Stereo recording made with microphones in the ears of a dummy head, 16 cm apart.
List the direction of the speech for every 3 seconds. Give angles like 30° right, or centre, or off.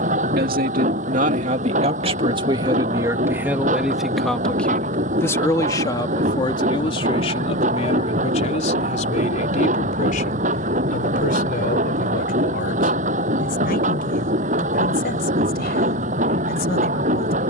40° right, centre, 30° left, 50° left, 50° left, 60° left.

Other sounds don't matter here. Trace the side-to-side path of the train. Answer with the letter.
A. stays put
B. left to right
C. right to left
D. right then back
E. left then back
A.